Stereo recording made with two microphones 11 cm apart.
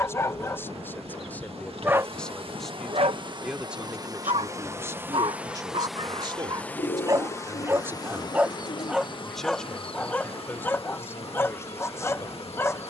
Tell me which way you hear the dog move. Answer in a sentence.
In this clip you hear the dog move from left to right and back again.